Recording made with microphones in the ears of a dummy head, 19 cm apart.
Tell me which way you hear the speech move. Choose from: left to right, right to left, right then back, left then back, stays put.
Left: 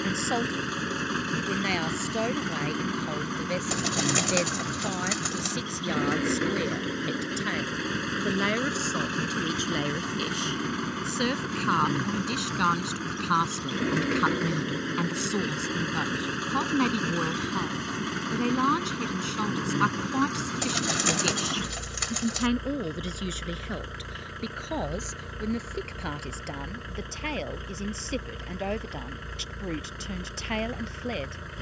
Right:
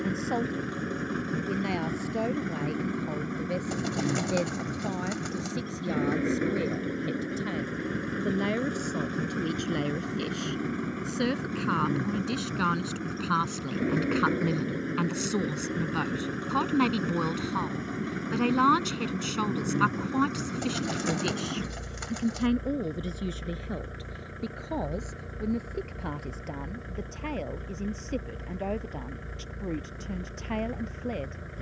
right then back.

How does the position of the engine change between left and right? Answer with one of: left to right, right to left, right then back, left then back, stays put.
stays put.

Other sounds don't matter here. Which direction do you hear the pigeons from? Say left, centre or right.
left.